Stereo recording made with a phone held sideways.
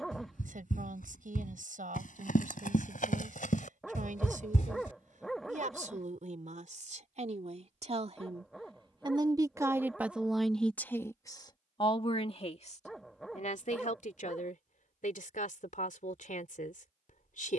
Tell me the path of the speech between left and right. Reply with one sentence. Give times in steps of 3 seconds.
You can hear the speech on the right from 0 s, in the centre from 9 s and on the left from 12 s.